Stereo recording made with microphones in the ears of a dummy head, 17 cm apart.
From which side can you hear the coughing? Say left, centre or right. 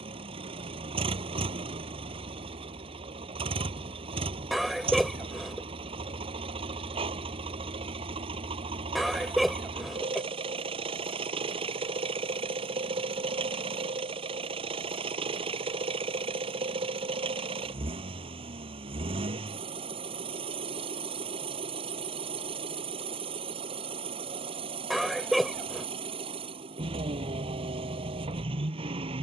centre.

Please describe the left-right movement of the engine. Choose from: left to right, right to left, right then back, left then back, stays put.
stays put.